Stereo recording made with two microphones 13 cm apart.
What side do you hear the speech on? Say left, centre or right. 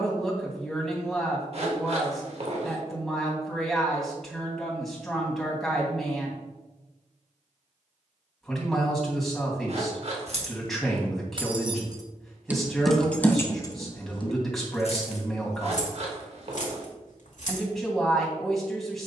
centre.